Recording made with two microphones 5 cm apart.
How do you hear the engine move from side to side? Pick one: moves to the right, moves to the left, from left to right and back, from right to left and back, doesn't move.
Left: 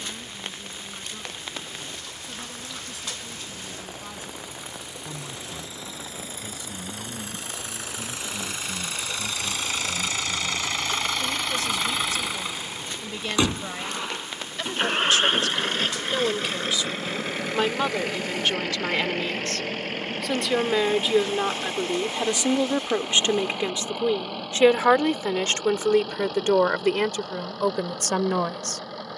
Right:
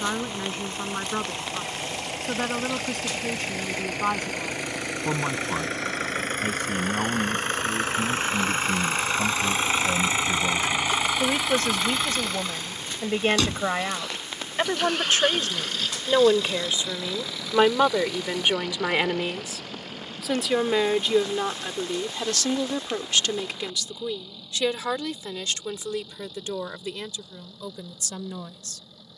moves to the left.